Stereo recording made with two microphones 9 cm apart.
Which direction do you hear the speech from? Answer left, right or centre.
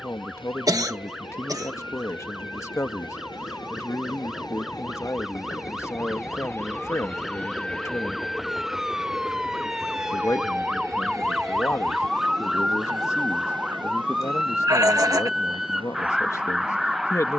left.